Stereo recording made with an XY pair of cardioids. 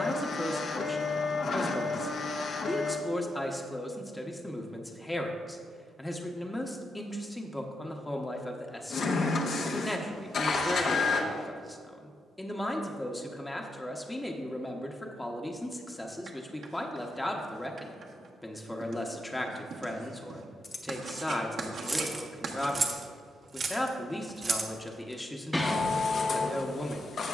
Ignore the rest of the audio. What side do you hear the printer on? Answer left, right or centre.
left.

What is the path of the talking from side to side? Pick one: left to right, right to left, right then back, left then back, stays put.
stays put.